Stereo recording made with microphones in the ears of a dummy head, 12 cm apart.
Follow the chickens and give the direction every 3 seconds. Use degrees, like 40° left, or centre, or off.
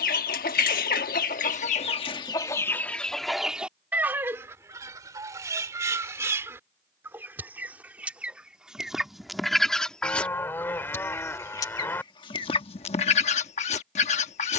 50° left, 10° right, 10° right, 10° left, 40° left.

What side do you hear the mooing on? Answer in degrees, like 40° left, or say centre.
10° left.